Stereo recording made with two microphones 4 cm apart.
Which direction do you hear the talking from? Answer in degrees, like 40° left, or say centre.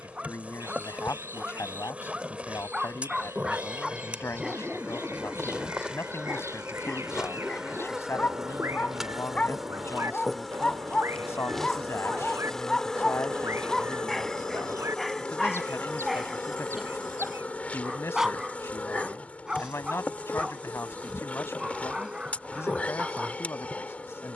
80° left.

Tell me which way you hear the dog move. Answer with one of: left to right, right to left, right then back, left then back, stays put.
left then back.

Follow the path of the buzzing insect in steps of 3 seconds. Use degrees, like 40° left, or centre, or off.
30° right, 20° right, 10° right, centre, 20° left, 30° left, 30° left, 30° left.